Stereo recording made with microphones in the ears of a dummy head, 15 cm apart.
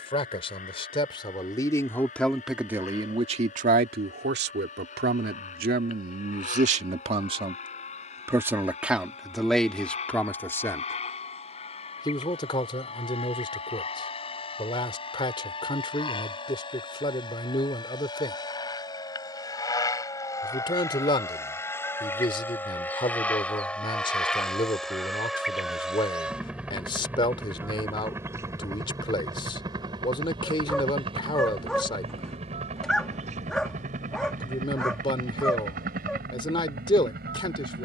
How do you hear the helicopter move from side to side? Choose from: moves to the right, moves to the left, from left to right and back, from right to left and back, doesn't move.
moves to the right.